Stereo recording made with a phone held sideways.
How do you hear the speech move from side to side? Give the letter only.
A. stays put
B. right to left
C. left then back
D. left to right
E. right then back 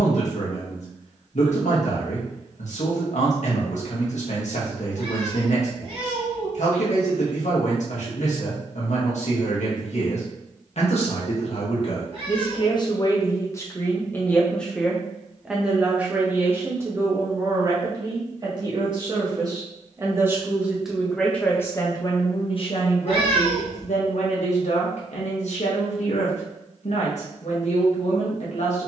E.